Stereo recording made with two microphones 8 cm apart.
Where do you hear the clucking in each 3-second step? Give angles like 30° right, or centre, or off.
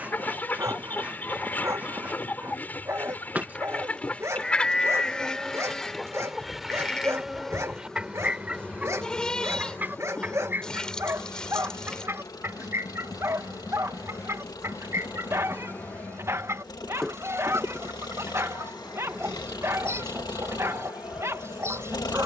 20° left, 10° left, 10° right, 30° right, 40° right, 40° right, 40° right, 40° right.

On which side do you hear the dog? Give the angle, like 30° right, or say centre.
40° right.